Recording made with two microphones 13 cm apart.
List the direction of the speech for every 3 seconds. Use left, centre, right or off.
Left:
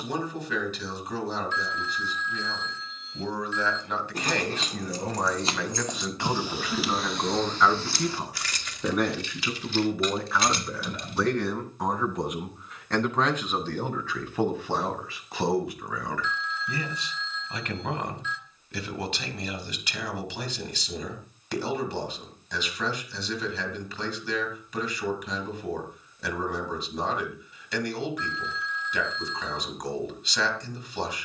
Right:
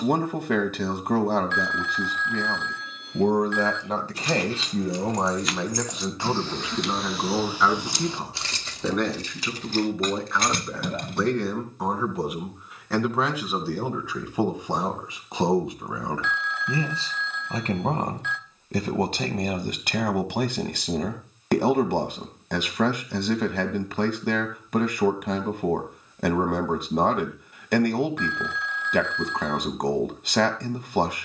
right, right, centre, centre, centre, right, right, right, right, right, right.